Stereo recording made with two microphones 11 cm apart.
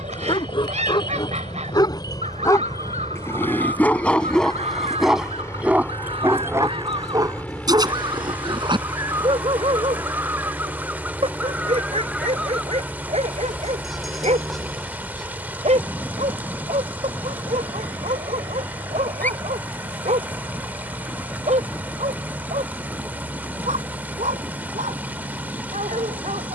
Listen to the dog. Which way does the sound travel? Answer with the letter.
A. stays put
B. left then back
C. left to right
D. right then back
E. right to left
C.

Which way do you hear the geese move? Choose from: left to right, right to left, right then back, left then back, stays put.
right to left.